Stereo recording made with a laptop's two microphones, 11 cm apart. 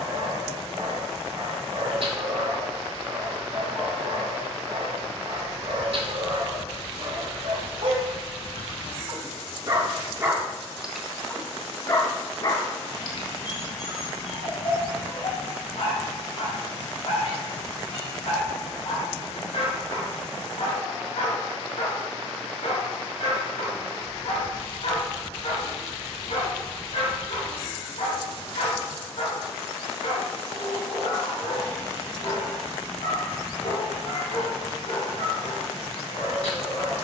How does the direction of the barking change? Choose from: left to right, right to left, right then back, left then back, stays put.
right to left.